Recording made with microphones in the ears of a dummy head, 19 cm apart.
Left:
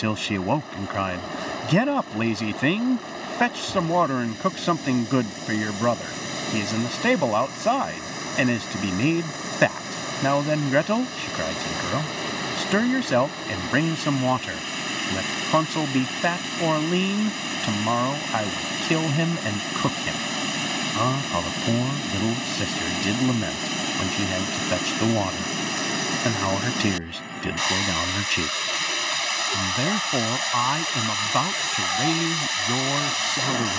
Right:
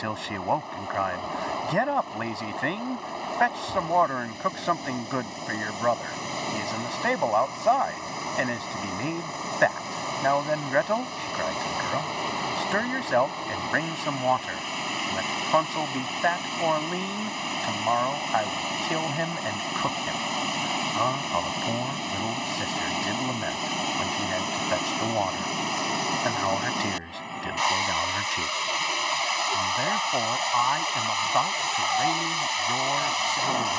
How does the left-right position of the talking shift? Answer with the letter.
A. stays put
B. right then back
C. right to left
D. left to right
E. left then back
A.